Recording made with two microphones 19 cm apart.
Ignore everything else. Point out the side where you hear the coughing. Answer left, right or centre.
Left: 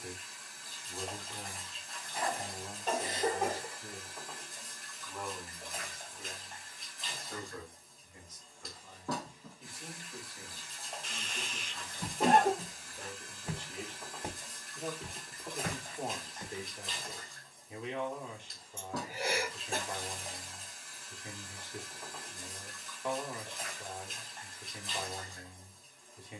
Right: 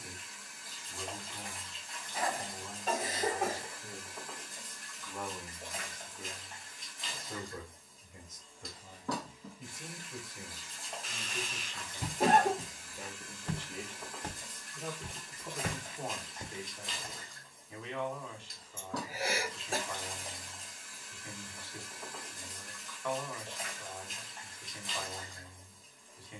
centre.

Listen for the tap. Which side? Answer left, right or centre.
centre.